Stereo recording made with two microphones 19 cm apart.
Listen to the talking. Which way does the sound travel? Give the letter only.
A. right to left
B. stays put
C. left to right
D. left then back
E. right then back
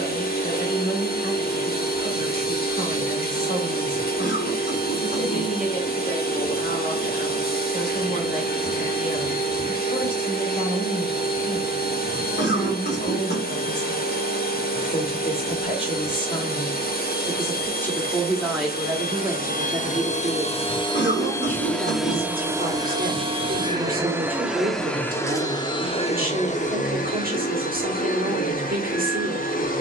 C.